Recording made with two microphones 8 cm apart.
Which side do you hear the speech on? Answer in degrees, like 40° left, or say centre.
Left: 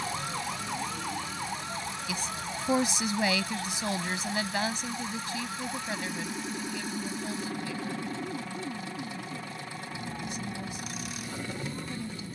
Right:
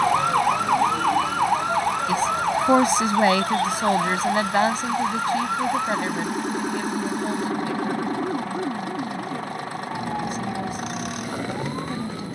50° right.